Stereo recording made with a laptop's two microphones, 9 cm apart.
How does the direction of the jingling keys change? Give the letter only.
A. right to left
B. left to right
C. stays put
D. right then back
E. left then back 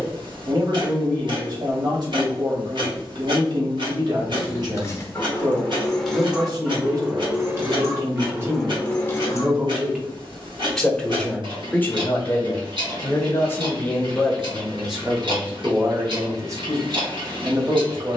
D.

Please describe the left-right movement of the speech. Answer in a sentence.
In this clip you hear the speech go left and come back.